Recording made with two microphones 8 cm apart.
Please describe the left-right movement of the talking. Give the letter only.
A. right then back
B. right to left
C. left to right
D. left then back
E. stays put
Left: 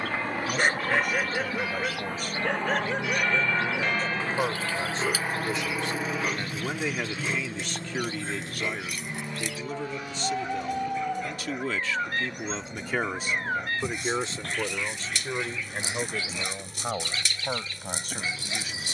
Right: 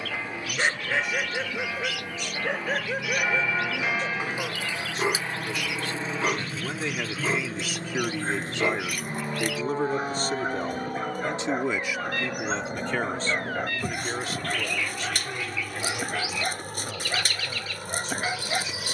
A.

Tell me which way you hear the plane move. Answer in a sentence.
In this clip you hear the plane move to the right.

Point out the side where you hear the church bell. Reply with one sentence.
You can hear the church bell in the centre.